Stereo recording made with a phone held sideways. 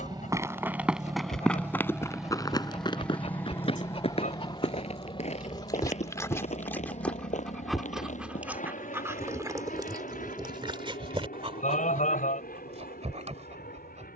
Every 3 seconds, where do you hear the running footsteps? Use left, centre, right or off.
centre, left, left, off, off.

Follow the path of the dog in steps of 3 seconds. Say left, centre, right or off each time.
left, left, centre, right, right.